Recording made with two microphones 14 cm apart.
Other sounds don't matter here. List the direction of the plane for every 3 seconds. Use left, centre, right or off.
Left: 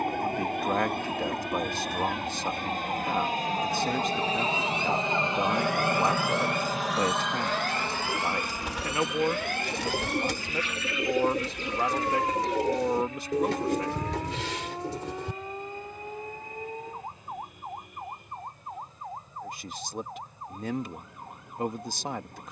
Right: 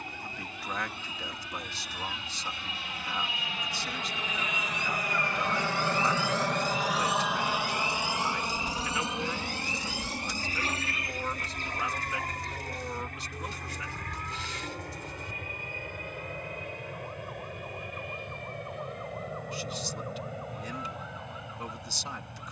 left, left, centre, right, right, right, right, right.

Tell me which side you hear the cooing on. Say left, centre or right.
left.